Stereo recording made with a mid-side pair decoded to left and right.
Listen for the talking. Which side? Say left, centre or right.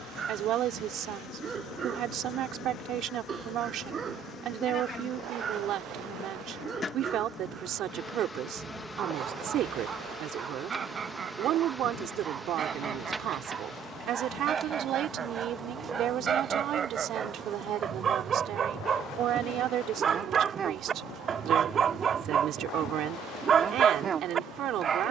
right.